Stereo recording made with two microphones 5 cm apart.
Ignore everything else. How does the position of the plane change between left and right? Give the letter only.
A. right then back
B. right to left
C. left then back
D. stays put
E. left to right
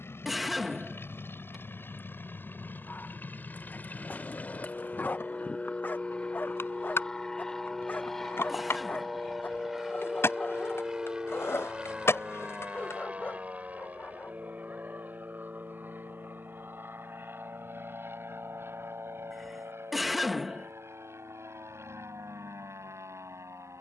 E.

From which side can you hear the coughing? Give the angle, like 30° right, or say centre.
centre.